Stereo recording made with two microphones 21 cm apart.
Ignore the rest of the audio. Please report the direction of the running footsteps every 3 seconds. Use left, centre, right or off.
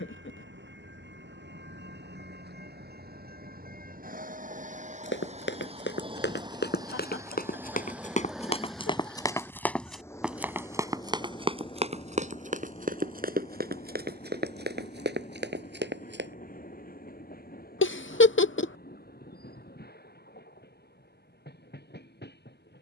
off, left, left, centre, right, right, off, off.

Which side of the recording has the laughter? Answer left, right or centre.
left.